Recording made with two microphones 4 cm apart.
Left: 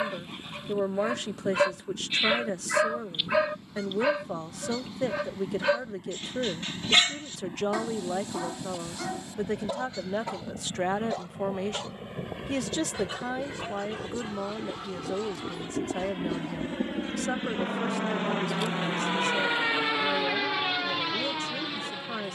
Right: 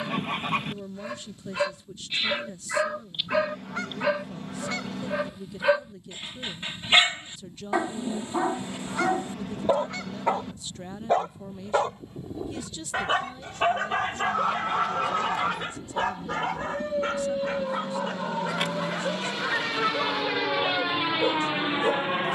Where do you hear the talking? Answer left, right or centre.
left.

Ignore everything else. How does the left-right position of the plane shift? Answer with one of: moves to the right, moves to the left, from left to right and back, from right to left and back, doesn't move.
moves to the right.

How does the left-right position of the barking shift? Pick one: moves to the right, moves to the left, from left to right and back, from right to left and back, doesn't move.
moves to the right.